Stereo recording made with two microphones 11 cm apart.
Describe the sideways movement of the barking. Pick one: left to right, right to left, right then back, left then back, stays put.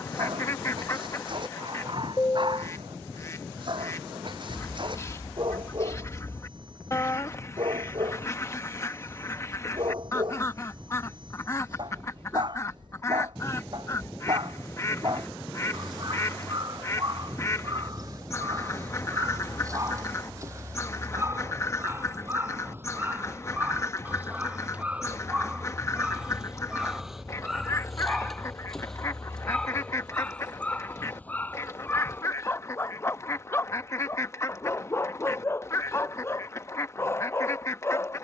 right to left.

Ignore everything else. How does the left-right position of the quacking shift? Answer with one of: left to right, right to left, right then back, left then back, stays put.
stays put.